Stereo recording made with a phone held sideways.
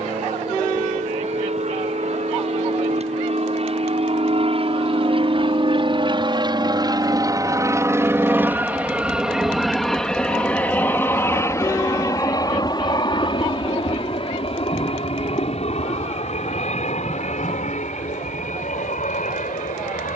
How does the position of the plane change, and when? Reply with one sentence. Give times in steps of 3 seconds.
You can hear the plane on the right from 0 s, in the centre from 9 s and on the left from 12 s.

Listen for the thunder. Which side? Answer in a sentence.
You can hear the thunder on the left.